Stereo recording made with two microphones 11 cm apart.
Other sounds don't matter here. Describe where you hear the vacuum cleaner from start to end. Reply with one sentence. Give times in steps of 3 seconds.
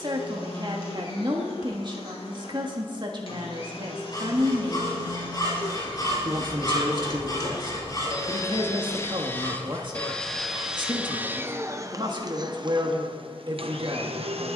In this clip you hear the vacuum cleaner on the left from 0 s, in the centre from 9 s and on the right from 12 s.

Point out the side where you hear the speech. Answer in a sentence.
In this clip you hear the speech on the right.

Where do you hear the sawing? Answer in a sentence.
In this clip you hear the sawing on the left.